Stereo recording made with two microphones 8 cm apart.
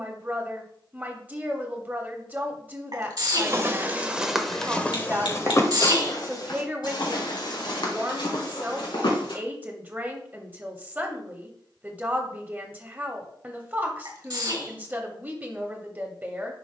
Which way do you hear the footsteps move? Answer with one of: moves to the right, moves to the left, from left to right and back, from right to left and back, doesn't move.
moves to the left.